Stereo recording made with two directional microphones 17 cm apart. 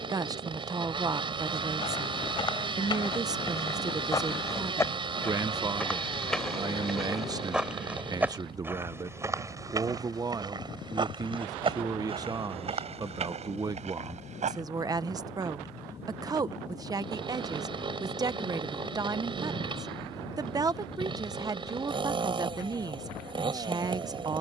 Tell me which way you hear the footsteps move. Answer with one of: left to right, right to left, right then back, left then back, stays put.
left to right.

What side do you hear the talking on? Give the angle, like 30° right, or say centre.
20° right.